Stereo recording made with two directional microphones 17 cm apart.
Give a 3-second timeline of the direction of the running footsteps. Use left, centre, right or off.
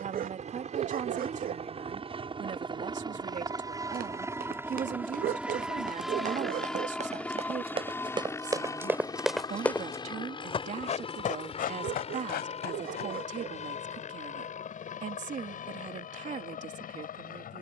off, right, right, left, left, off.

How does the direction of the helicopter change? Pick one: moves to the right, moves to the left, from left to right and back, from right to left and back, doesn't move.
moves to the left.